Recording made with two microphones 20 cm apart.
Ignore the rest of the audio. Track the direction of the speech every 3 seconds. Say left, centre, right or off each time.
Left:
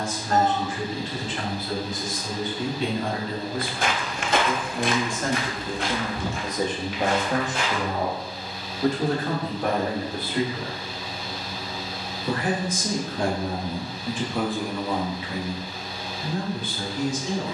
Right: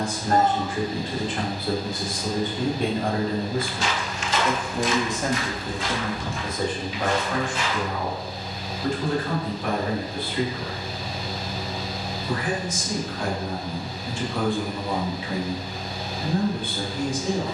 right, right, left, left, left, right.